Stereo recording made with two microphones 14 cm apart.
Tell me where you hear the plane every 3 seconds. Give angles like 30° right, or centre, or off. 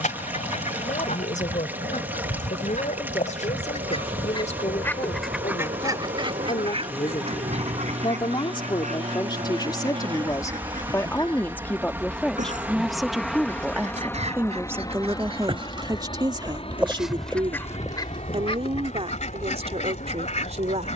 80° right, 70° right, 60° right, 30° right, 10° left, 40° left, 50° left.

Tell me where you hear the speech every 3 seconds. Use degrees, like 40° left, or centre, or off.
60° left, 60° left, 40° left, 20° left, 10° right, 30° right, 50° right.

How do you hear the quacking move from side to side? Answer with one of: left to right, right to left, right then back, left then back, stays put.
right then back.